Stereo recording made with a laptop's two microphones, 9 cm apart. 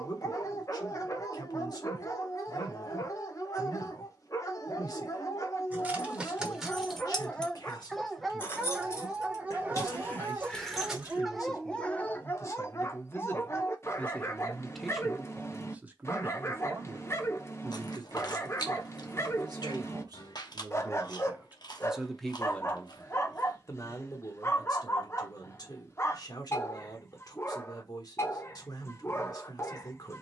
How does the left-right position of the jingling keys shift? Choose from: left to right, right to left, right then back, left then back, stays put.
left then back.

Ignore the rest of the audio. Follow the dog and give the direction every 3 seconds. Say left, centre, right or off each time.
left, left, centre, centre, left, left, left, left, left, left.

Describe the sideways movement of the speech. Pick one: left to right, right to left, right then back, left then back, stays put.
right then back.